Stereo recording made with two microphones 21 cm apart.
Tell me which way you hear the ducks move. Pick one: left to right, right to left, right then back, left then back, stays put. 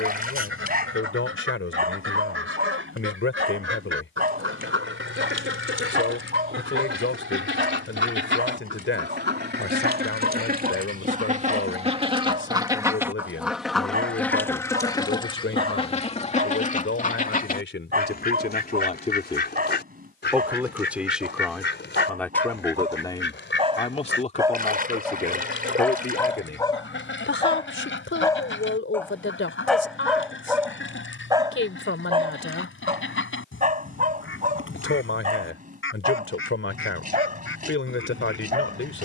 right to left.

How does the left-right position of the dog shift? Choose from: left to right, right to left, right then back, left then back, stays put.
left then back.